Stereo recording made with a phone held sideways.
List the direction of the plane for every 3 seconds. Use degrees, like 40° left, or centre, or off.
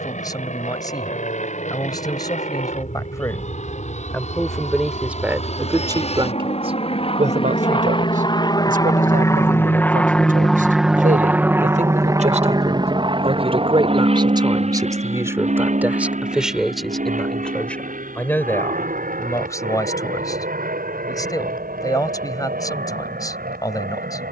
70° left, 60° left, 40° left, centre, 40° right, 60° right, 60° right, 70° right.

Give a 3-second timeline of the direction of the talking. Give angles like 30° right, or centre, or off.
30° left, centre, 60° right, 70° right, 40° right, 10° right, 20° left, 30° left.